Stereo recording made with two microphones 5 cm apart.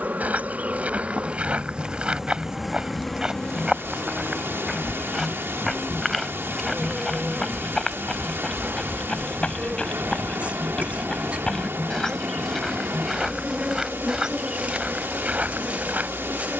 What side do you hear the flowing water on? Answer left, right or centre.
right.